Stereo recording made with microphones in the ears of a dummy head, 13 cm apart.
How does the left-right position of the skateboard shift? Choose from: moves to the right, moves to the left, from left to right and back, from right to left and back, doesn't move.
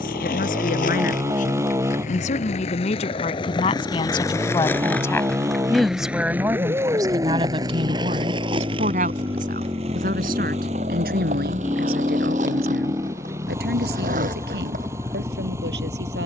moves to the right.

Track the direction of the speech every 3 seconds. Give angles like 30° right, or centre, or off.
50° left, 30° left, 30° right, 60° right, 80° right, 80° right.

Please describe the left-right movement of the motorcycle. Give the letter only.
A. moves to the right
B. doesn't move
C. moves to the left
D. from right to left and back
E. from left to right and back
B.